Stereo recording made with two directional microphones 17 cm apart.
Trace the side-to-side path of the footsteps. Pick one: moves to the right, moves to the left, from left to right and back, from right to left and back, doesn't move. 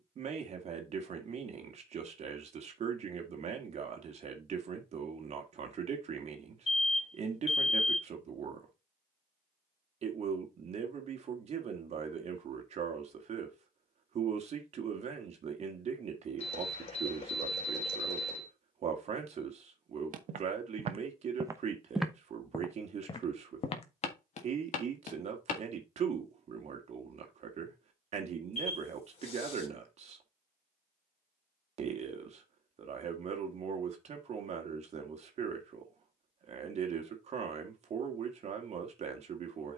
moves to the left.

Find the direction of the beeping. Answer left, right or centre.
left.